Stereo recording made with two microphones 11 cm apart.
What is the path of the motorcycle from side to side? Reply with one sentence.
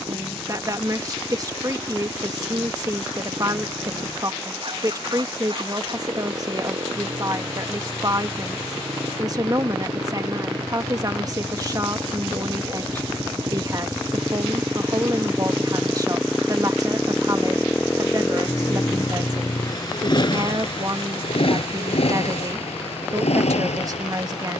You can hear the motorcycle go from the right side to the left.